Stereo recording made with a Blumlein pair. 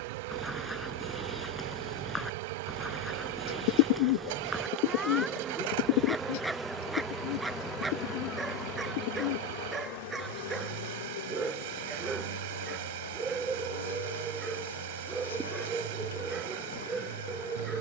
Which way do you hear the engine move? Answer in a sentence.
In this clip you hear the engine stay put.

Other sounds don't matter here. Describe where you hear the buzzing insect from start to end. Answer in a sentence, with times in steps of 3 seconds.
You can hear the buzzing insect on the right from 0 s, in the centre from 6 s and on the left from 9 s.